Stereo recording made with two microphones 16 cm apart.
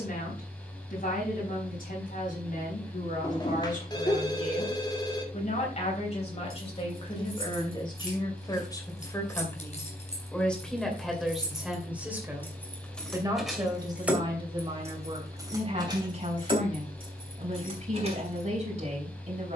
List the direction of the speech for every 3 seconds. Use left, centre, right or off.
left, left, left, centre, right, right, right.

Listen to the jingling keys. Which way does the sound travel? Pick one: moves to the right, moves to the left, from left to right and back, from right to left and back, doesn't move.
moves to the right.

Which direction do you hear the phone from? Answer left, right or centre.
left.